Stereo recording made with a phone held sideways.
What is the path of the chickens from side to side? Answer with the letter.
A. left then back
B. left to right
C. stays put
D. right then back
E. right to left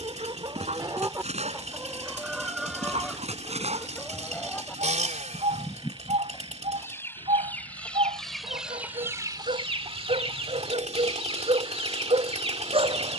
A.